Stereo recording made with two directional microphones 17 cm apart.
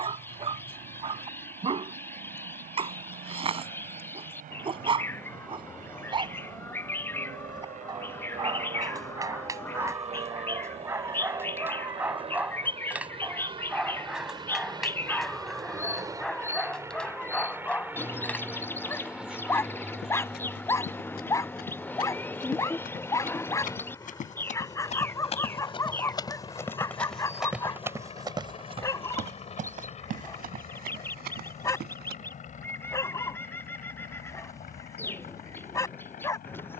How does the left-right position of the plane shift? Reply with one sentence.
You can hear the plane move to the left.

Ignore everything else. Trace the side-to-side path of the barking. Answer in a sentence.
You can hear the barking move to the left.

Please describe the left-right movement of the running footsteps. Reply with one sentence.
In this clip you hear the running footsteps move from left to right.